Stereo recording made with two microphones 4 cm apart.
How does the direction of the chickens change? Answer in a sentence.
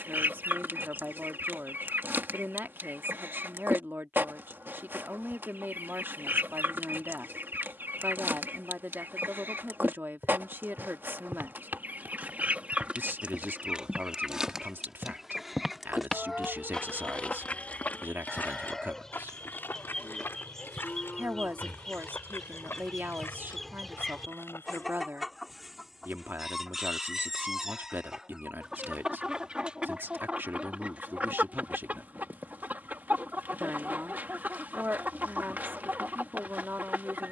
You can hear the chickens move from right to left and back again.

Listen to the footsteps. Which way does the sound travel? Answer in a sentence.
You can hear the footsteps move to the left.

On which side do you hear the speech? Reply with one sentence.
You can hear the speech on the right.